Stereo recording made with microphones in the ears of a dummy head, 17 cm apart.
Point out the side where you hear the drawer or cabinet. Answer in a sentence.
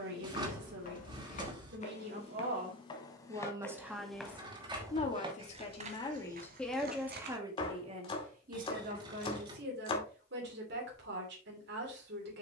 You can hear the drawer or cabinet on the right.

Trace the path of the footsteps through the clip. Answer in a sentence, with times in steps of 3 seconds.
In this clip you hear the footsteps on the left from 0 s, in the centre from 3 s, on the right from 6 s and not at all from 9 s.